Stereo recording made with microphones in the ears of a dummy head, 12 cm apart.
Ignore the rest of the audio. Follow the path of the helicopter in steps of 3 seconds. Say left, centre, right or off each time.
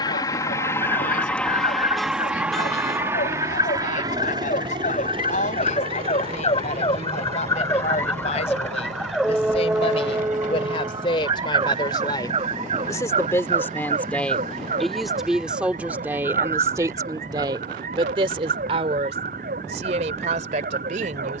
centre, right, right, right, right, right, right.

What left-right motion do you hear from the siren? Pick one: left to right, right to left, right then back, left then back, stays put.
left to right.